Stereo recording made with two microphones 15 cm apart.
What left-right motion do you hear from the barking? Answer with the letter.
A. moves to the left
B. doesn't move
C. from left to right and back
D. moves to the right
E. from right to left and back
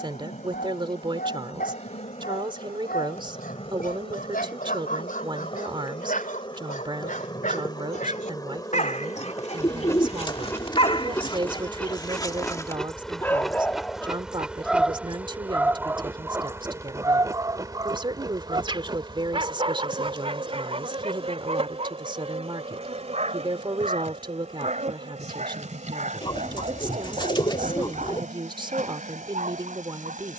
D.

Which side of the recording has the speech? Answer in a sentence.
In this clip you hear the speech on the right.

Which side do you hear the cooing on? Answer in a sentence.
In this clip you hear the cooing on the left.